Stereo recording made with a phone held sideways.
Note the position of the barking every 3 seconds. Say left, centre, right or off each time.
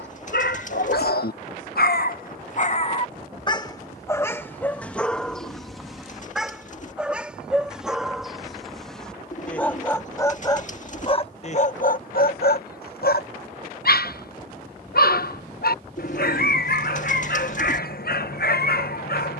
left, centre, centre, left, left, left, left.